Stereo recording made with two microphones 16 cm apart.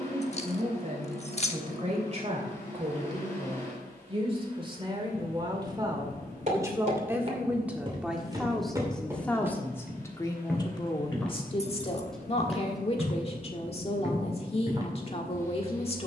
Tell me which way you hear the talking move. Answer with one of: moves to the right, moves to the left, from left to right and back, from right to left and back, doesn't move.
moves to the left.